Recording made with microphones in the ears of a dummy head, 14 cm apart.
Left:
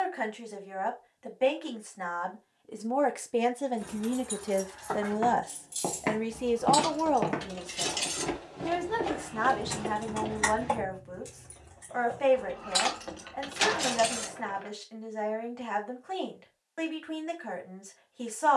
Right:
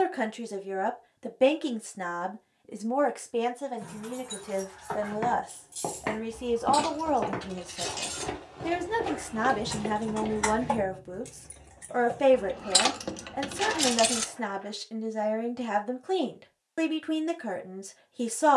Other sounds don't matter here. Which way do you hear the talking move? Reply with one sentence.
You can hear the talking move from right to left and back again.